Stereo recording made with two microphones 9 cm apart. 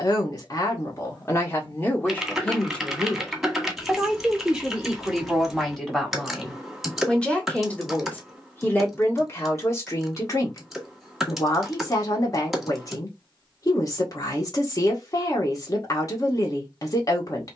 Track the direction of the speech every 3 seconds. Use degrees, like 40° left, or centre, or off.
30° left, centre, 10° left, 30° left, 40° left, 40° left.